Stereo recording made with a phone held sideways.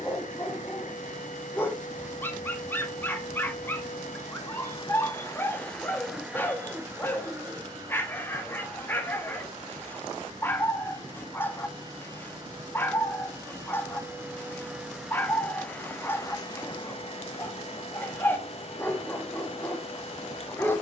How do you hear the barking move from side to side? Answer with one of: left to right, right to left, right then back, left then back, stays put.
stays put.